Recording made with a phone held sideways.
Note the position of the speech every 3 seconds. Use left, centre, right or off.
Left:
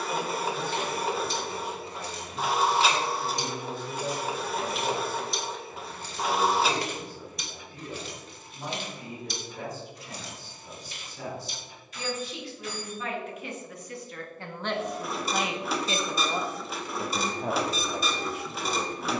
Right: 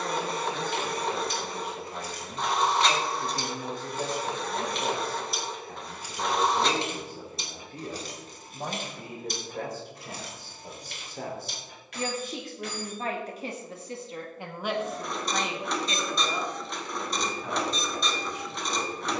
right, right, right, right, right, left, left.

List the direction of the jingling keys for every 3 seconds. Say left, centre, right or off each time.
left, centre, right, right, right, off, off.